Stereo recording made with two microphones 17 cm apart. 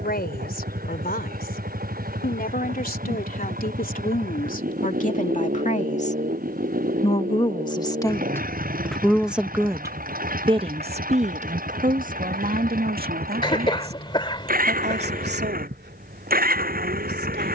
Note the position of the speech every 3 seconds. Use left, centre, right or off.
left, left, left, right, right, right.